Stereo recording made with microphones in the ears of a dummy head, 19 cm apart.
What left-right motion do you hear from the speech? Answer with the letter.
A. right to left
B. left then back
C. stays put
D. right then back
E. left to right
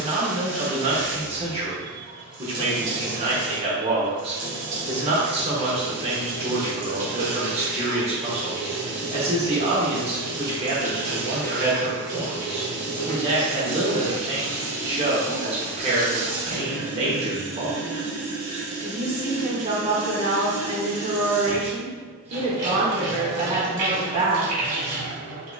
C.